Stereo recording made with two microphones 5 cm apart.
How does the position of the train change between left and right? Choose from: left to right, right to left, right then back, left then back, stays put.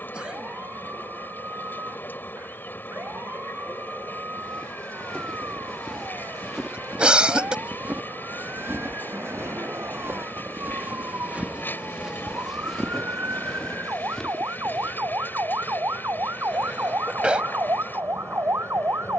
stays put.